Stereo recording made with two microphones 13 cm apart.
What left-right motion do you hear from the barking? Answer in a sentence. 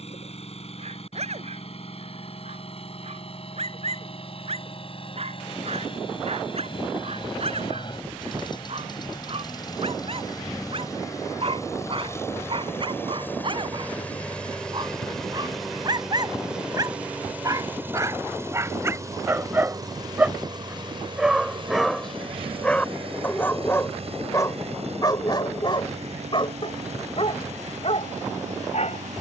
In this clip you hear the barking move from right to left.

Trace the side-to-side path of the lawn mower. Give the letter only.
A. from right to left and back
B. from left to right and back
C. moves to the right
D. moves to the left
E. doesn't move
C.